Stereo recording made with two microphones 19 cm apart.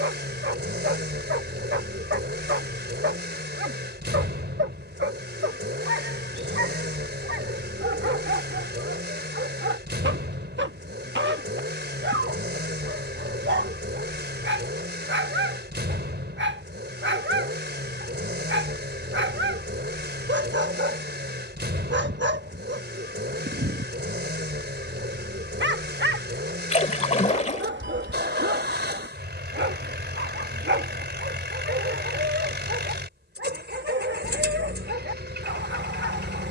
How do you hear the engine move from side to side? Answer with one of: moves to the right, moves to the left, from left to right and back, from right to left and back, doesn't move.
doesn't move.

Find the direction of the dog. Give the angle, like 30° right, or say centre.
70° right.